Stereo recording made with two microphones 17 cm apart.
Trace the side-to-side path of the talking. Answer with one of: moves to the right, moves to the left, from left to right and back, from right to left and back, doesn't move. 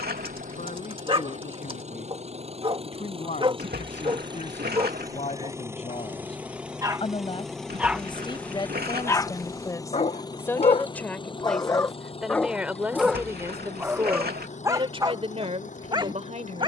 moves to the right.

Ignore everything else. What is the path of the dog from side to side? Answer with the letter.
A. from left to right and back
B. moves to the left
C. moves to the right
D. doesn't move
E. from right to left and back
E.